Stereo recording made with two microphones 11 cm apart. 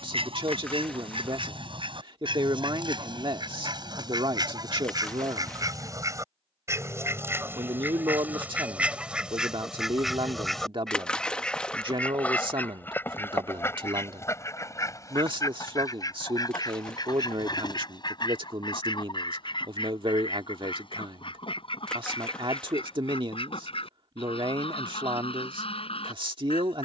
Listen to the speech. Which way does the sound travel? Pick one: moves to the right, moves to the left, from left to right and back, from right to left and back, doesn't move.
doesn't move.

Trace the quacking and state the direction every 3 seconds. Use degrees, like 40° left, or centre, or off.
50° right, 40° right, 20° right, centre, 20° left, 40° left, 50° left, 50° left, 60° left.